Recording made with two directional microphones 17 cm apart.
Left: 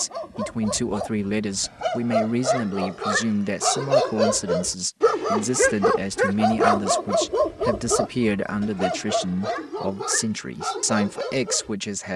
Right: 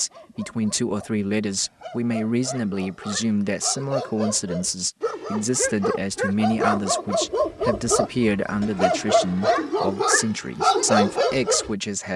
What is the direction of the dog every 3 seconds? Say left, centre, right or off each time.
left, left, centre, right.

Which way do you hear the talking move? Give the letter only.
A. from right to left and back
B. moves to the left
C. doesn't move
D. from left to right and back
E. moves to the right
C.